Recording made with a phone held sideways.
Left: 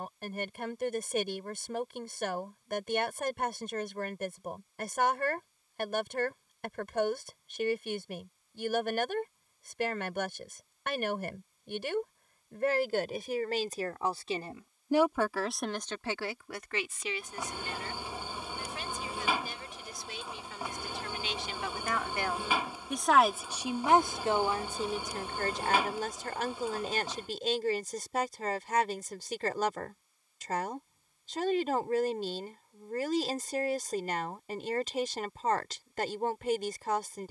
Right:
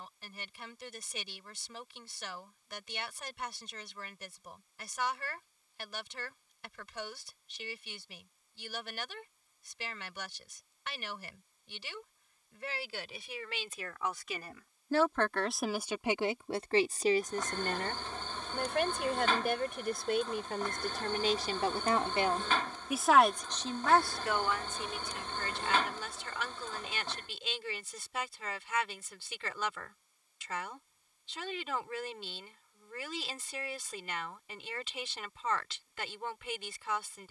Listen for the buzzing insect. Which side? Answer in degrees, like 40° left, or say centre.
10° left.